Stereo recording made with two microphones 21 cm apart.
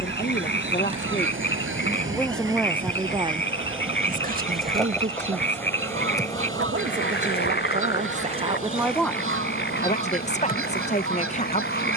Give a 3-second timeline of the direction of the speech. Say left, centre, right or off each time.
left, right, right, left.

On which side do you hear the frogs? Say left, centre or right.
left.